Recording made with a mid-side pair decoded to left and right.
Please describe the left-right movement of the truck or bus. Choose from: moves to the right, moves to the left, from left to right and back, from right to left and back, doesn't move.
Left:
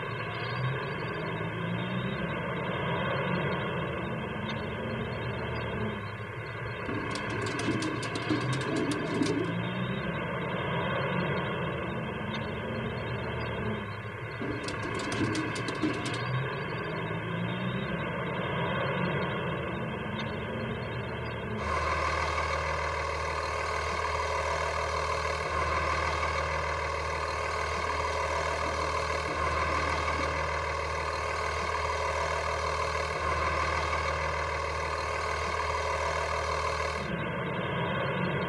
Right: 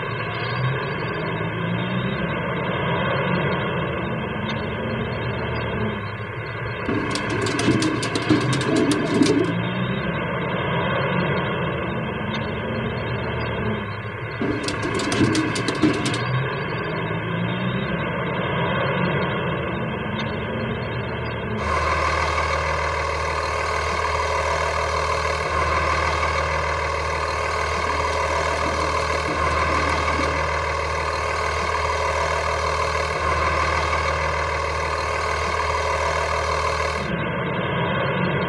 doesn't move.